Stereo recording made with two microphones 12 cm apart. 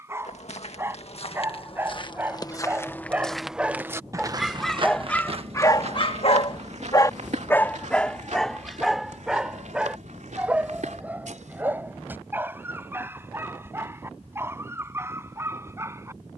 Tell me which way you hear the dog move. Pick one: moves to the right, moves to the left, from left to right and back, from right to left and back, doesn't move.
from right to left and back.